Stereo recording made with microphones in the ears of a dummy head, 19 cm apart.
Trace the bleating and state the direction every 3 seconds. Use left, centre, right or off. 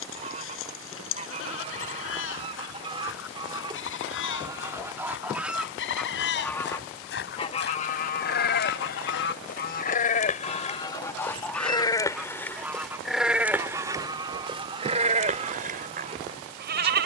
left, left, left, left, centre, right.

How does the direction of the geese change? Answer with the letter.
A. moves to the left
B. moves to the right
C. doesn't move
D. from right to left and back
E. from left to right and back
D.